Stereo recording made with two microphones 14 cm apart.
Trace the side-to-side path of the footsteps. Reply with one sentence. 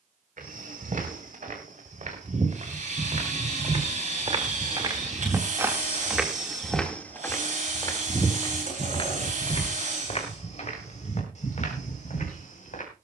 In this clip you hear the footsteps go from the right side to the left.